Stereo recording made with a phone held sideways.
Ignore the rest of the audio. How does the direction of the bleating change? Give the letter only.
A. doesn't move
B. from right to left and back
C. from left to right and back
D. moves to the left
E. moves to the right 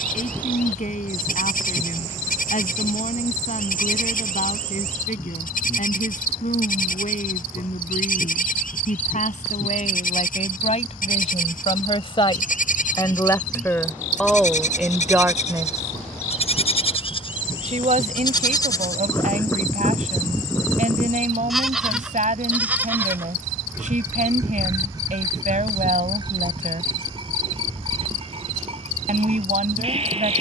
E.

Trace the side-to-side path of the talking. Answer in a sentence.
In this clip you hear the talking move to the right.